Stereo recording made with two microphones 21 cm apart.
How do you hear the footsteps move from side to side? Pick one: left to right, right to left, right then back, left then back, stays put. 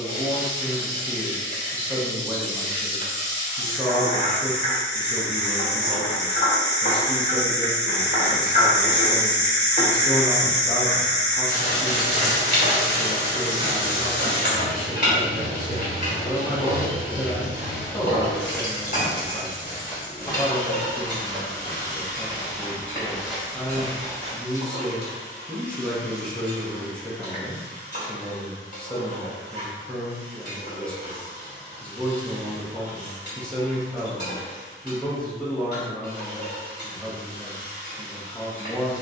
left then back.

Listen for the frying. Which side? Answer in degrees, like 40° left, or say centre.
50° left.